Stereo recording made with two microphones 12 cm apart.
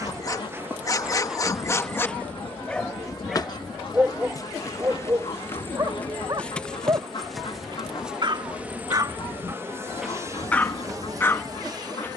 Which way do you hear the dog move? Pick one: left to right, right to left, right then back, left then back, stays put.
right then back.